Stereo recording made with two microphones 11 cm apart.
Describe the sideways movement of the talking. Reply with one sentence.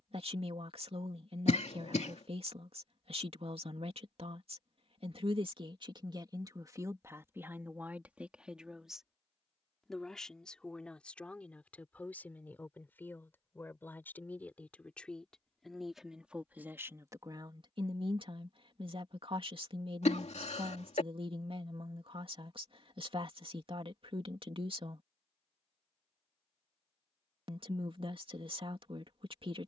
In this clip you hear the talking move from right to left and back again.